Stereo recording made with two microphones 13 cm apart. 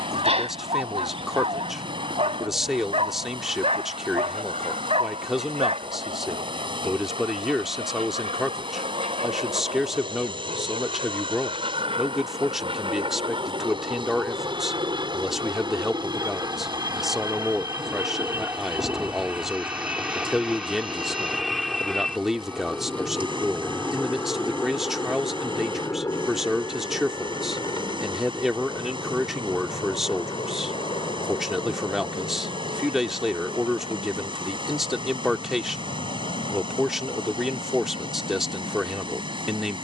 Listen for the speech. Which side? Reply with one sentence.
You can hear the speech in the centre.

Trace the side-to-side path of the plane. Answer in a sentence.
You can hear the plane travel towards the left.